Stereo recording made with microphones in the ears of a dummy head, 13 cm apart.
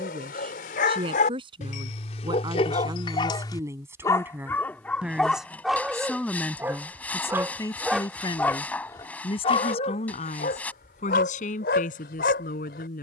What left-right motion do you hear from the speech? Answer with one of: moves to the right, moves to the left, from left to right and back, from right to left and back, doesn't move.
moves to the left.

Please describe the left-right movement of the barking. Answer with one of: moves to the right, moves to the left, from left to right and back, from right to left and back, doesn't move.
from left to right and back.